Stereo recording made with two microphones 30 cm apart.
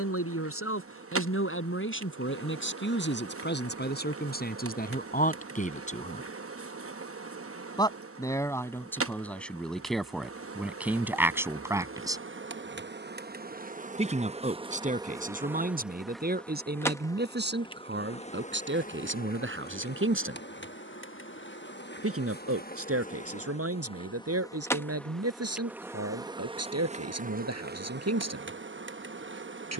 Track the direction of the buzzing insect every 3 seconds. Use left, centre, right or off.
right, right, right, right, right, centre, left, left, centre, right.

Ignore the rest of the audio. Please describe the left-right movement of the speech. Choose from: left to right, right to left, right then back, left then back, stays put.
left to right.